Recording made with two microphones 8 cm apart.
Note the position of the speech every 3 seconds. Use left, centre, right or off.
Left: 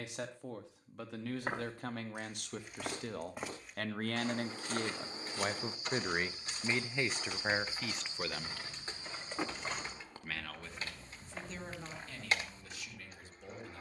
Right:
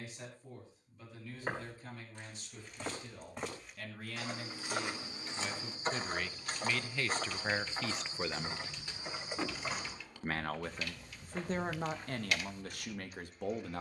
left, left, centre, right, right.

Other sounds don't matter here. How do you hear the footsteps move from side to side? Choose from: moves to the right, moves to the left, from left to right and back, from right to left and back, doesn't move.
from left to right and back.